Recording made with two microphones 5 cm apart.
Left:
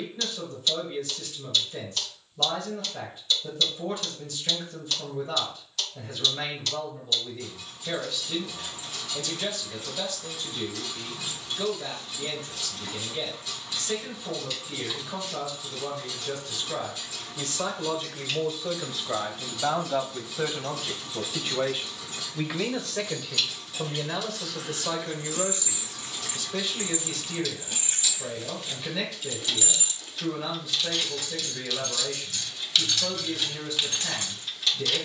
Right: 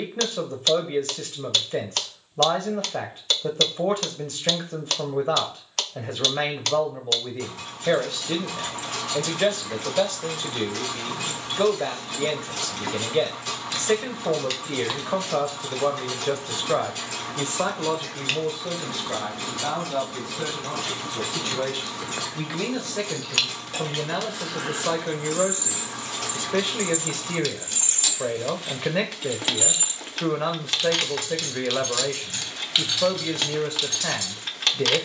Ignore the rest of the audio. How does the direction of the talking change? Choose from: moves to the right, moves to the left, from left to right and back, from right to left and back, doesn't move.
from right to left and back.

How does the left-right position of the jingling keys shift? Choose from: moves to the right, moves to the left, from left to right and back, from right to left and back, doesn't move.
from left to right and back.